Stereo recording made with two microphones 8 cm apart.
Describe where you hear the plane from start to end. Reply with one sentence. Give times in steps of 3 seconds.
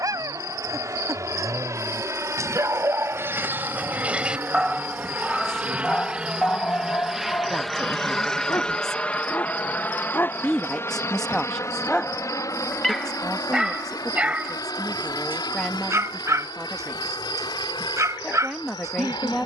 In this clip you hear the plane on the right from 0 s, in the centre from 6 s and on the left from 9 s.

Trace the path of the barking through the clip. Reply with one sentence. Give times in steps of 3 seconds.
In this clip you hear the barking on the right from 0 s, in the centre from 3 s, on the left from 6 s, in the centre from 12 s and on the right from 15 s.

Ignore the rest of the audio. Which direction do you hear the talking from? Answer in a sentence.
You can hear the talking in the centre.